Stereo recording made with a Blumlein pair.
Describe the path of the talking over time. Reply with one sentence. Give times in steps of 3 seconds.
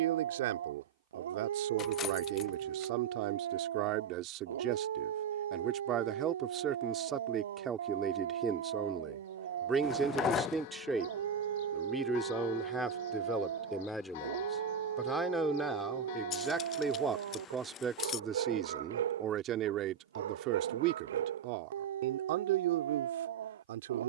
In this clip you hear the talking on the right from 0 s, in the centre from 9 s and on the right from 18 s.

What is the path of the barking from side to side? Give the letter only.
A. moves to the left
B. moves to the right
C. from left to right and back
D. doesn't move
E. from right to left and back
D.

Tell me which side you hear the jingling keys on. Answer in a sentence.
You can hear the jingling keys on the left.